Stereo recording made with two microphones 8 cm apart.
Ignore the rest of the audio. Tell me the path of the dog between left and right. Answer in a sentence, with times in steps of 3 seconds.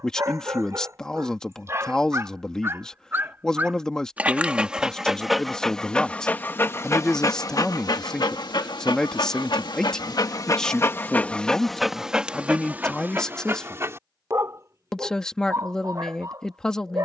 In this clip you hear the dog on the right from 0 s, in the centre from 3 s, on the left from 6 s and on the right from 12 s.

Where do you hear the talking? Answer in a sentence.
In this clip you hear the talking in the centre.